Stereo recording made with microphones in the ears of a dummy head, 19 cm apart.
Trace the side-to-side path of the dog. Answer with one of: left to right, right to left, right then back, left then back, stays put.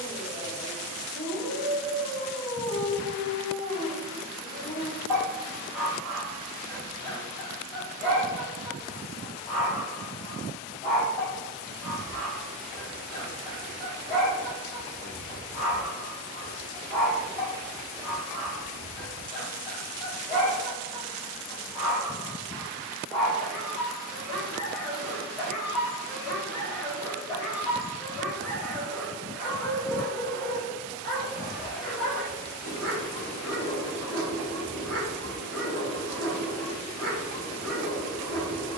stays put.